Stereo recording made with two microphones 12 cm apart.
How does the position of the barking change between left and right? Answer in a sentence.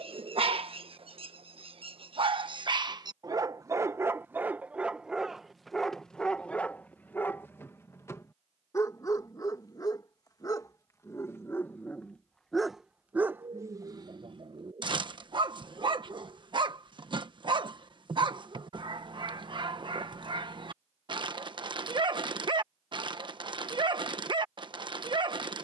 In this clip you hear the barking move from right to left and back again.